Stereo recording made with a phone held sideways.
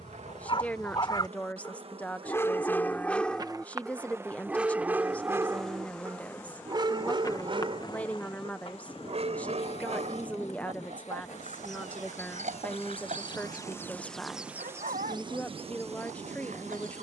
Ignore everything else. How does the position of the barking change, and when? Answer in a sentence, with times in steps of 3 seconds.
In this clip you hear the barking on the left from 0 s, in the centre from 3 s and on the right from 6 s.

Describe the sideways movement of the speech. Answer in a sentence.
In this clip you hear the speech stay in one place.